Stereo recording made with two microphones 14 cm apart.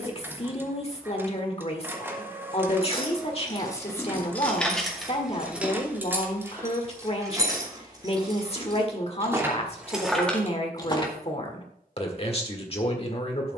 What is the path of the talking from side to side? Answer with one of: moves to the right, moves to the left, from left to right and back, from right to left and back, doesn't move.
doesn't move.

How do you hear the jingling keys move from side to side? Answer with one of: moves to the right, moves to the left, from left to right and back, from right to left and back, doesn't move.
from left to right and back.